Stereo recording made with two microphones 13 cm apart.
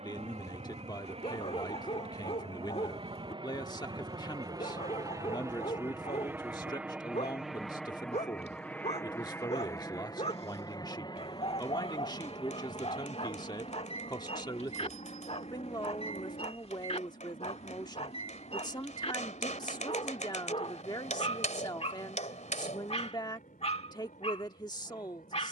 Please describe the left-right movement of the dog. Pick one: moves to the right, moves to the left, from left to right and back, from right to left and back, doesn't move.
doesn't move.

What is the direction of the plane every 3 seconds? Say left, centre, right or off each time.
right, right, centre, left, left, left, left, left, left.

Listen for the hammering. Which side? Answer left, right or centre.
left.